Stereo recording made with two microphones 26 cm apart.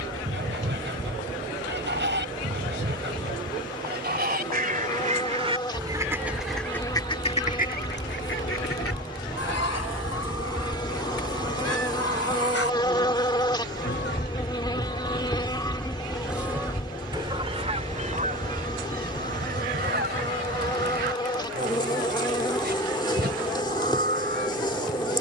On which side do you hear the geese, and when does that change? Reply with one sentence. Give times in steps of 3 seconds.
You can hear the geese on the right from 0 s, on the left from 6 s, in the centre from 15 s and on the right from 18 s.